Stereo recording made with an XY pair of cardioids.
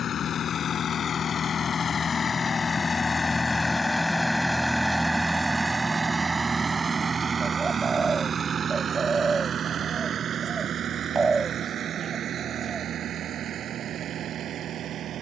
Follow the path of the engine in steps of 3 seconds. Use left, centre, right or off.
left, centre, right, right, right.